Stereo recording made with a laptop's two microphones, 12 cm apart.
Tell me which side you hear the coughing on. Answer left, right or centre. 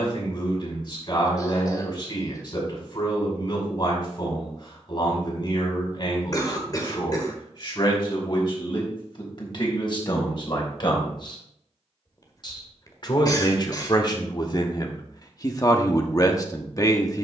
left.